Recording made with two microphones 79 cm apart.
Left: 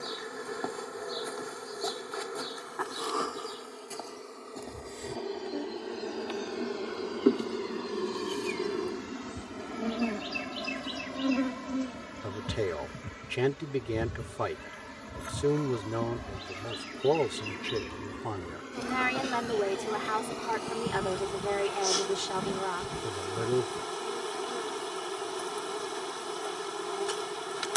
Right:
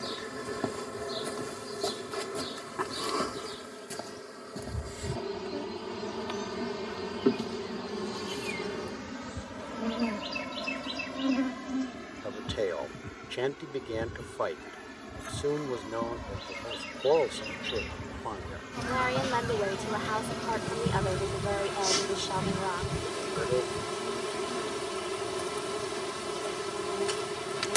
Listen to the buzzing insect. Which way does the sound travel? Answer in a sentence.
In this clip you hear the buzzing insect go left and come back.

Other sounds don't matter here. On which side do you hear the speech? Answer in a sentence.
In this clip you hear the speech on the left.